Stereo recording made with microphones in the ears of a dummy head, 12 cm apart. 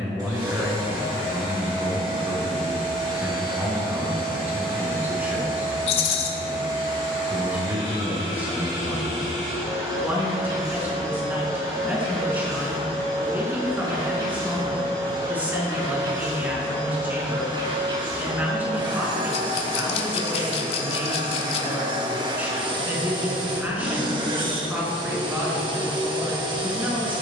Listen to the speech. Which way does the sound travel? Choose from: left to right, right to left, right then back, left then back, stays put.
stays put.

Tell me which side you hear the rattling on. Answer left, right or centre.
left.